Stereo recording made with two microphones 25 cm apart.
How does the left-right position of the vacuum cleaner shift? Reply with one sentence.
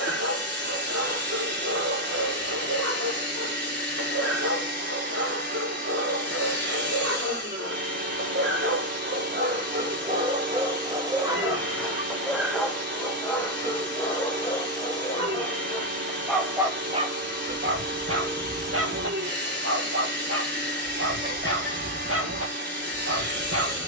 In this clip you hear the vacuum cleaner stay put.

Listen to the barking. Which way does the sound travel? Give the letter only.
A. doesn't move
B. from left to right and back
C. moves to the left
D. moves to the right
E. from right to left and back
E.